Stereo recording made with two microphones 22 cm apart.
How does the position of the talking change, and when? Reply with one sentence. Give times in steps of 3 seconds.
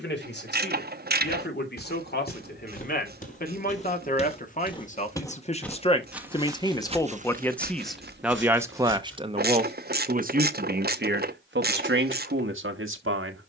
You can hear the talking on the left from 0 s, in the centre from 6 s and on the right from 9 s.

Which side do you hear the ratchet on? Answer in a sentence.
In this clip you hear the ratchet on the right.